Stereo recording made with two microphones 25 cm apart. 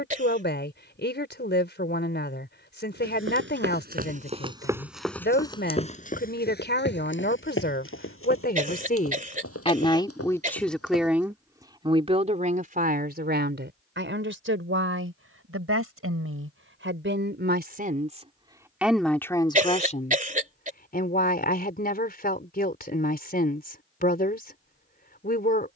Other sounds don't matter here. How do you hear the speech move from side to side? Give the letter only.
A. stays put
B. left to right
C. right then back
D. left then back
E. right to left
C.